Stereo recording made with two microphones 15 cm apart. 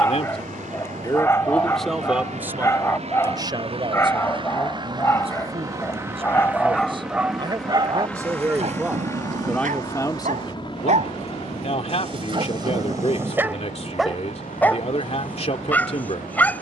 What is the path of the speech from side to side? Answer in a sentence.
You can hear the speech go right and come back.